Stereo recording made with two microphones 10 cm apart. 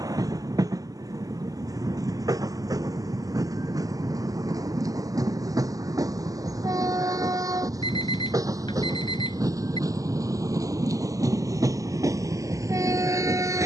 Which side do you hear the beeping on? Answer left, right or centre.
left.